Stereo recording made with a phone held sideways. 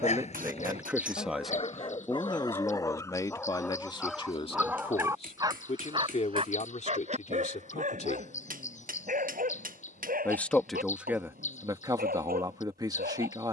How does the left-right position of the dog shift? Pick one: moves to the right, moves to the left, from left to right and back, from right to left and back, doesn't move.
moves to the right.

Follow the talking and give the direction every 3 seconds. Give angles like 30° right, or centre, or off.
centre, 30° left, 50° left, 10° right, 20° right.